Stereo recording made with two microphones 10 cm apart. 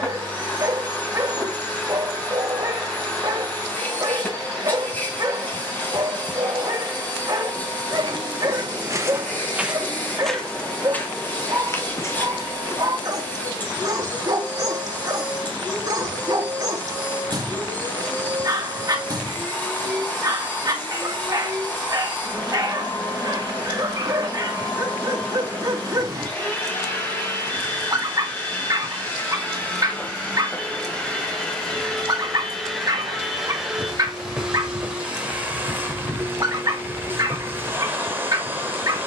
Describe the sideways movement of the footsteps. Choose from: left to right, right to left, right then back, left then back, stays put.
right to left.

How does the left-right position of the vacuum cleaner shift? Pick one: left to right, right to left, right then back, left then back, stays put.
left to right.